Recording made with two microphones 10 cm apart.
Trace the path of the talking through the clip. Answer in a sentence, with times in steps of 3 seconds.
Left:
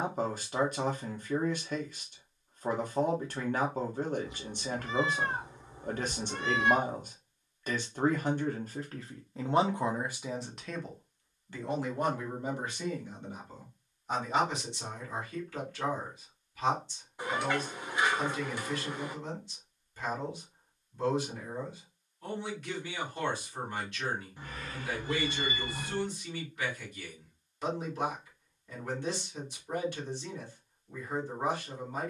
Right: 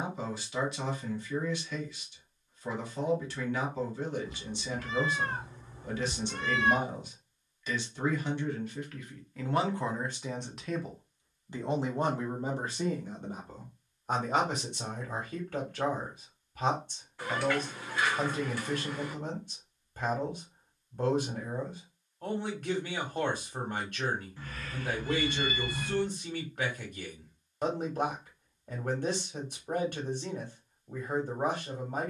In this clip you hear the talking on the left from 0 s, in the centre from 9 s and on the right from 12 s.